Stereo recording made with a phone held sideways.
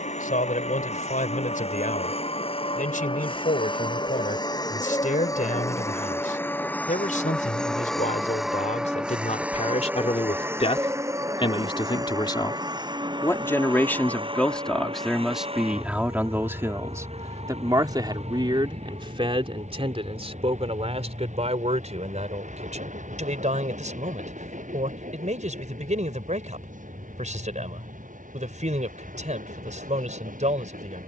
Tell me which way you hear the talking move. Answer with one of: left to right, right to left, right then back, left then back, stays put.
left to right.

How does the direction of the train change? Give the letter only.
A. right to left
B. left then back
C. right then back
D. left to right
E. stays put
D.